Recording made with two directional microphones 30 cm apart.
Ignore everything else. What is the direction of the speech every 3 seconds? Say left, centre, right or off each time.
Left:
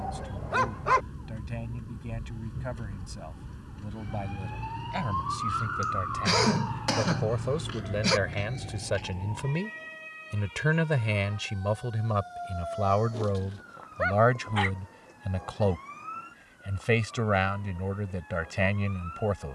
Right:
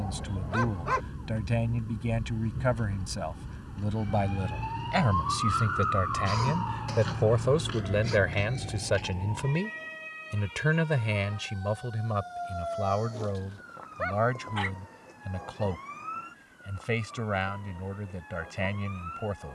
right, right, right, centre, left, left, left.